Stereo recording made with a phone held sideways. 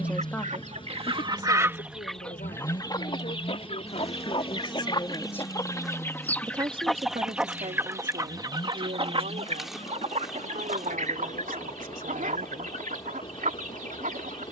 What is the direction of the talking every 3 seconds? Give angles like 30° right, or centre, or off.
40° left, 40° left, 50° right, 70° right, 70° right.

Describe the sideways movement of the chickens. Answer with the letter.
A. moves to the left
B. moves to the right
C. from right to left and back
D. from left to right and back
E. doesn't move
C.